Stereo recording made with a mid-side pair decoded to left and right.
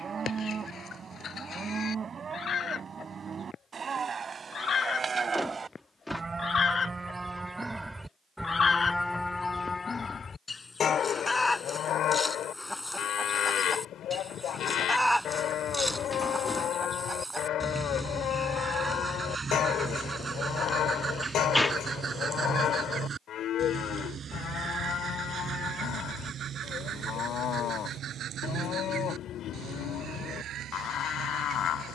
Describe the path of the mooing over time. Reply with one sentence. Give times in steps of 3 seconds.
In this clip you hear the mooing on the right from 0 s, in the centre from 6 s and on the left from 9 s.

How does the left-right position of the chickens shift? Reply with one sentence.
In this clip you hear the chickens move from left to right.